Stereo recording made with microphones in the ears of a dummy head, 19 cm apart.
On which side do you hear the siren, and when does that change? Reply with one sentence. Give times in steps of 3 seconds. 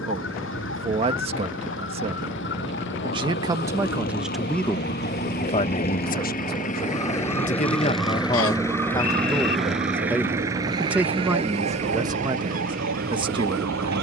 You can hear the siren on the left from 0 s, in the centre from 6 s and on the right from 9 s.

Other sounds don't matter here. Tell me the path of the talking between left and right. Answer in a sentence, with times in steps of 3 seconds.
In this clip you hear the talking on the right from 0 s, in the centre from 3 s, on the left from 6 s, in the centre from 9 s and on the right from 12 s.